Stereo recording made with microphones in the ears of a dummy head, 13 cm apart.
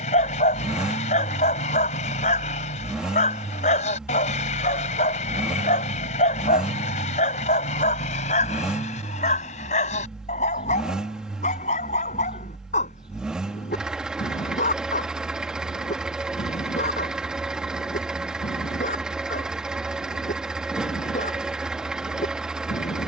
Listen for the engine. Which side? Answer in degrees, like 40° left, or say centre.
10° right.